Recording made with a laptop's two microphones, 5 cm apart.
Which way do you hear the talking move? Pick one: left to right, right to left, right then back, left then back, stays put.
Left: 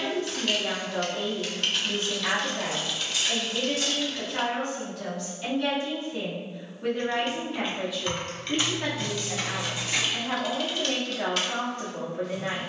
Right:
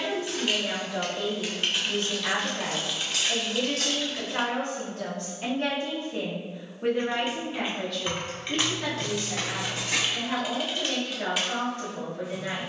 right then back.